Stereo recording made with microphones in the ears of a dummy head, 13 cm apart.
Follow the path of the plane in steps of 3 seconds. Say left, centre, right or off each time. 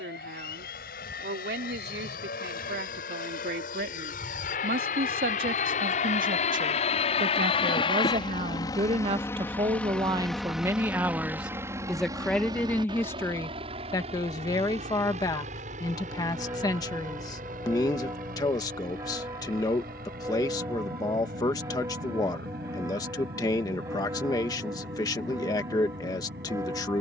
left, left, left, centre, right, right, right, right, right.